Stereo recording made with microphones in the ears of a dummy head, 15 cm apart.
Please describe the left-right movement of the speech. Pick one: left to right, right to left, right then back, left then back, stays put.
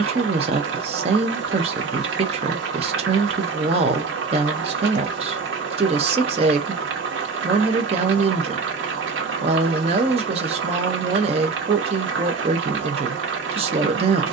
stays put.